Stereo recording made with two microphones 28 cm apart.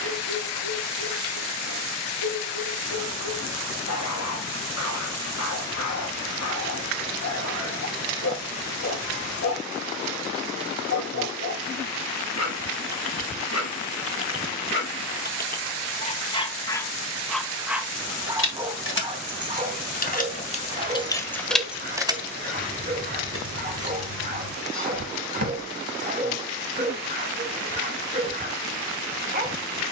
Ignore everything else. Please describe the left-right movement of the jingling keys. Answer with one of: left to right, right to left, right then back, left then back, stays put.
left to right.